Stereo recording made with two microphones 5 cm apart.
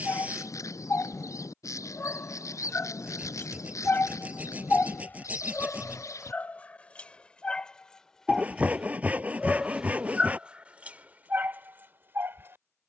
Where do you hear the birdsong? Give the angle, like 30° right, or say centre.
90° left.